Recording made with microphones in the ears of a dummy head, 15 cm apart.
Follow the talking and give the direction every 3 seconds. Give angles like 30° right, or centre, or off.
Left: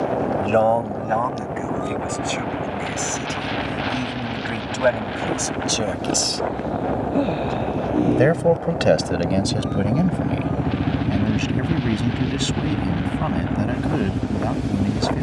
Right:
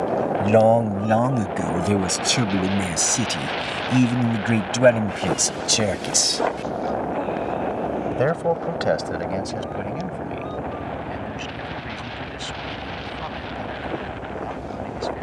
40° right, 30° right, 10° left, 50° left, 60° left.